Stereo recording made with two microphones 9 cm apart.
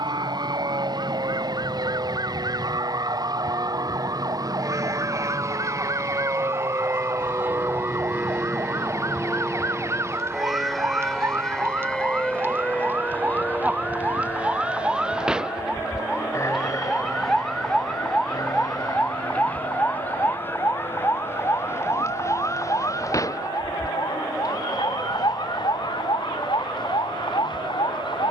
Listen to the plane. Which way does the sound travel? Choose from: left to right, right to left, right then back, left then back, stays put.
right to left.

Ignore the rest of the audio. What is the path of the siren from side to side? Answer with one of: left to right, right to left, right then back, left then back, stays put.
right to left.